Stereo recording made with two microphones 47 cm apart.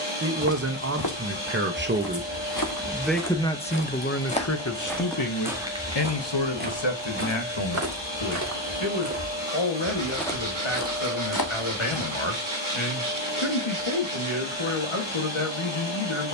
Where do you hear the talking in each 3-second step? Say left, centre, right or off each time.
right, left, left, left, left, left.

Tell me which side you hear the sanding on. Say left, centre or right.
right.